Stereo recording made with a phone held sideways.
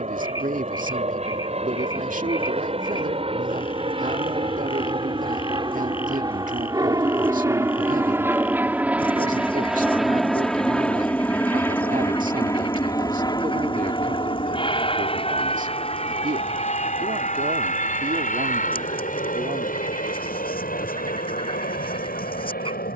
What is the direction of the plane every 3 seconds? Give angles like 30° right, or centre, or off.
50° right, 40° right, 20° right, centre, 30° left, 40° left, 50° left, 60° left.